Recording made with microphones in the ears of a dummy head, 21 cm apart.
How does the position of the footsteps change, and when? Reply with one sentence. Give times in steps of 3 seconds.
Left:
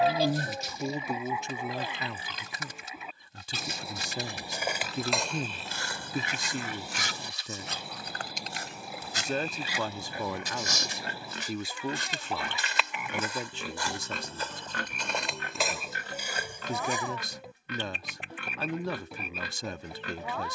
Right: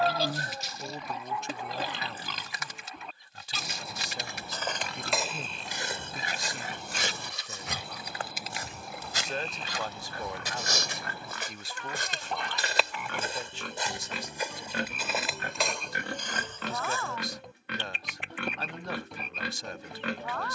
You can hear the footsteps not at all from 0 s, in the centre from 3 s, on the right from 6 s, in the centre from 15 s and not at all from 18 s.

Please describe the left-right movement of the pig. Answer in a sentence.
In this clip you hear the pig go left and come back.